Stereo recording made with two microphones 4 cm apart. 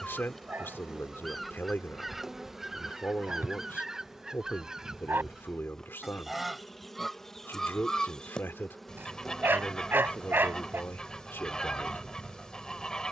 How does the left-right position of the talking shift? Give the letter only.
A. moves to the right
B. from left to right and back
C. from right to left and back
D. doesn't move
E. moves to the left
D.